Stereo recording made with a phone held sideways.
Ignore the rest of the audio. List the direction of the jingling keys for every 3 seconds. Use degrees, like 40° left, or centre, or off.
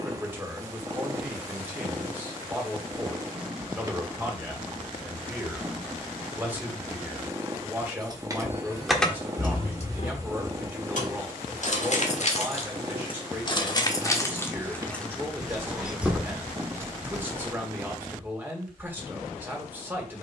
off, off, 20° right, 50° left, 30° left, 10° right, off.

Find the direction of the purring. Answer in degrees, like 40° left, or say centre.
20° right.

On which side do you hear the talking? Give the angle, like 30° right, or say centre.
10° right.